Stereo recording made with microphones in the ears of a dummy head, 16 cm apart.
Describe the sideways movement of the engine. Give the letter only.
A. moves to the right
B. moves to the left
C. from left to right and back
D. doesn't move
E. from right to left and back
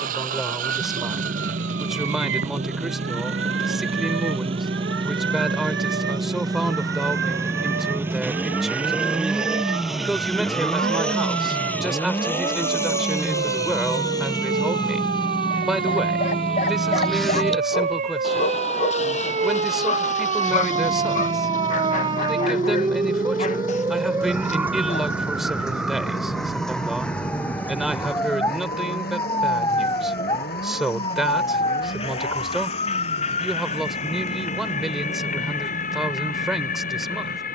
B.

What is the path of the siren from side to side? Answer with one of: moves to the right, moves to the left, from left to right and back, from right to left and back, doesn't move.
moves to the left.